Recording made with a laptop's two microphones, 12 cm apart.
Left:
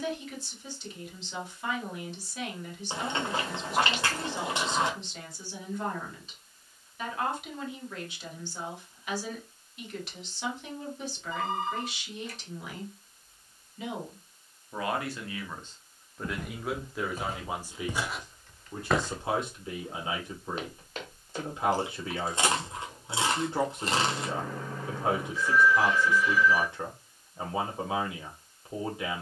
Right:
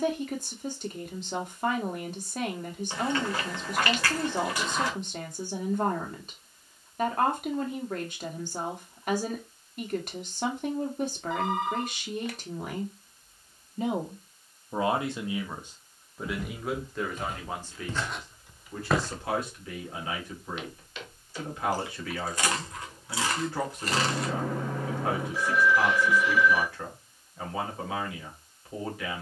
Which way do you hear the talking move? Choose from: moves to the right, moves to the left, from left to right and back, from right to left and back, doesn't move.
moves to the left.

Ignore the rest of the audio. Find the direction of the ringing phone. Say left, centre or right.
right.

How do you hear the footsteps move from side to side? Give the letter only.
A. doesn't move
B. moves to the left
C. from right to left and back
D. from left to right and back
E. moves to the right
D.